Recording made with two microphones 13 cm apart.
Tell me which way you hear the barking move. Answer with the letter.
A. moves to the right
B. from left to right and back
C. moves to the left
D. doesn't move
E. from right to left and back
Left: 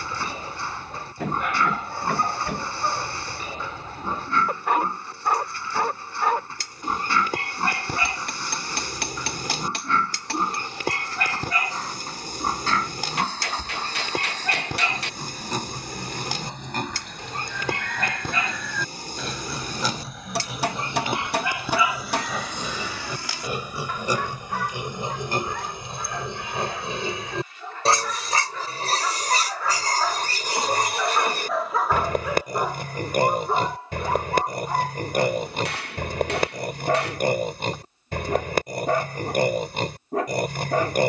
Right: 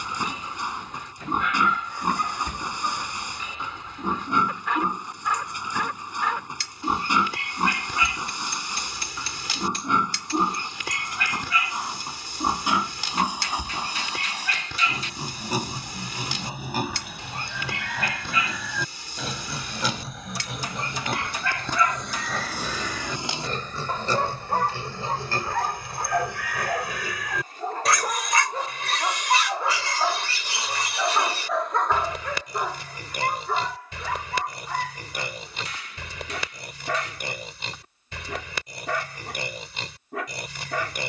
B.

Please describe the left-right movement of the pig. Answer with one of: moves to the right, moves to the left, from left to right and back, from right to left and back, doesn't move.
moves to the left.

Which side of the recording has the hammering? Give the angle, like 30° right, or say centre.
70° left.